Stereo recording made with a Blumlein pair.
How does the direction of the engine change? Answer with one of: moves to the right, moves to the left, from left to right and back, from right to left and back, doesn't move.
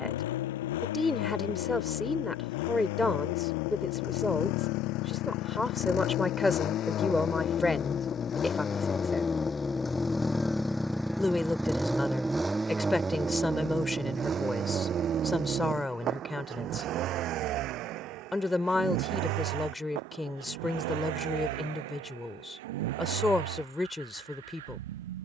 moves to the right.